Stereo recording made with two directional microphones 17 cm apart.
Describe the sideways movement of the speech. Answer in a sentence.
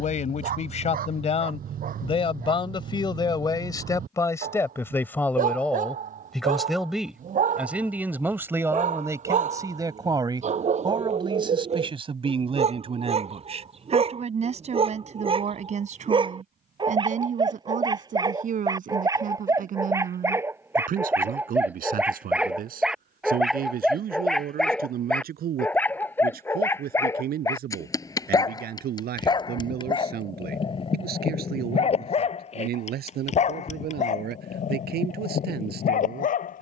You can hear the speech travel towards the right.